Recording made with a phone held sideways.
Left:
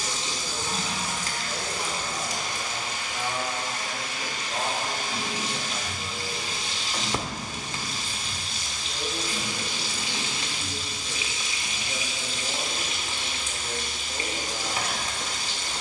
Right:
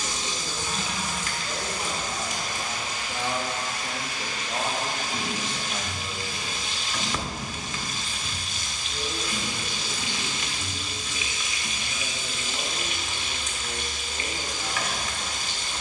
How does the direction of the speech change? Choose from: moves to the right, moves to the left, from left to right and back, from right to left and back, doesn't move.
moves to the left.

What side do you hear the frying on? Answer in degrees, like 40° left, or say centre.
30° left.